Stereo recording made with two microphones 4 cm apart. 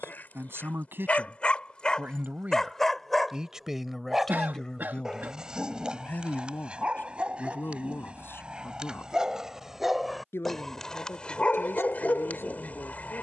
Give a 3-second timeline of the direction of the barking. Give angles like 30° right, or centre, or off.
20° left, 10° right, 30° right, 10° left, 40° left.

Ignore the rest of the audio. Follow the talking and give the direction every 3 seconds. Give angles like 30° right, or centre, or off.
50° right, 10° left, 60° left, 70° left, 70° left.